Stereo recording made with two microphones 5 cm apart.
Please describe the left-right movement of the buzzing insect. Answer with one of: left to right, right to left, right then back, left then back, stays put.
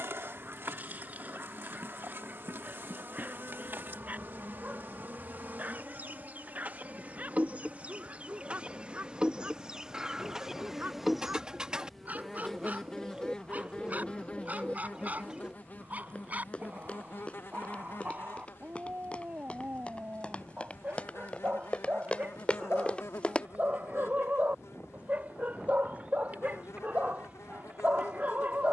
right to left.